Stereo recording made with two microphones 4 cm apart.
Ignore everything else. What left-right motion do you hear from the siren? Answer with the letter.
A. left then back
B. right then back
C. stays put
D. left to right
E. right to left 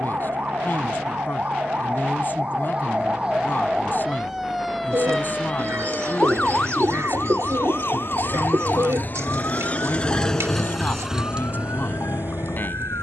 E.